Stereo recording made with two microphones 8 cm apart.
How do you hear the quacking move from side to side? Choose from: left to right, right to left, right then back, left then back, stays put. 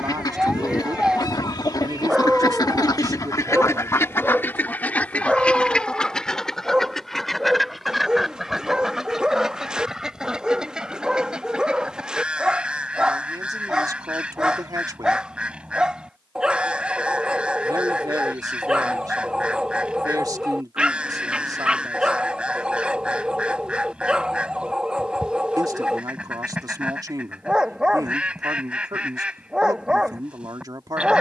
left to right.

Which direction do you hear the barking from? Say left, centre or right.
centre.